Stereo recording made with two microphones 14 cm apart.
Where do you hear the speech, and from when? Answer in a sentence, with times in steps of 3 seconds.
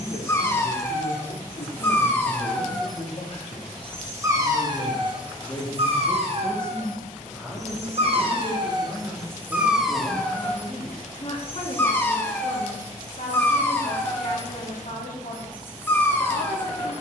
In this clip you hear the speech on the left from 0 s, in the centre from 6 s and on the left from 9 s.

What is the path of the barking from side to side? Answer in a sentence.
In this clip you hear the barking move from left to right and back again.